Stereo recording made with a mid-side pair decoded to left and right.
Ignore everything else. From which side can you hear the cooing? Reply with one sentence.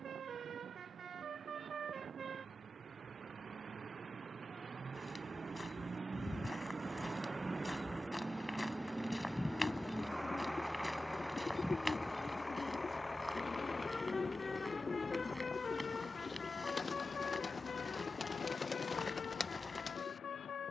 In this clip you hear the cooing on the left.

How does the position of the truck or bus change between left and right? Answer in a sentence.
You can hear the truck or bus move from right to left.